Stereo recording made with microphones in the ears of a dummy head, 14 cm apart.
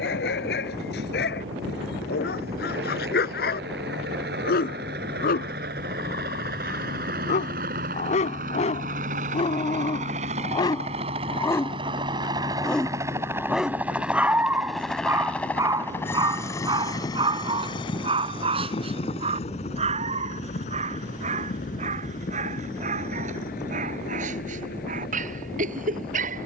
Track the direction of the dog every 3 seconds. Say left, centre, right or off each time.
left, left, left, left, centre, right, right, right, right.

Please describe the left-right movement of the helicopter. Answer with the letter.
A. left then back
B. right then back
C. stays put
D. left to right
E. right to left
E.